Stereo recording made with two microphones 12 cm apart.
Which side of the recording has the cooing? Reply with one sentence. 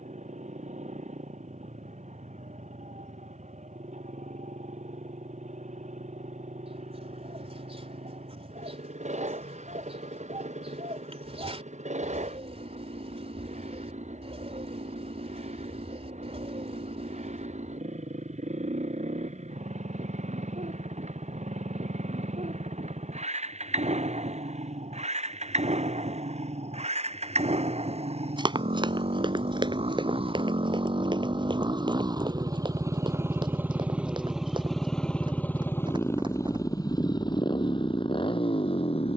You can hear the cooing on the right.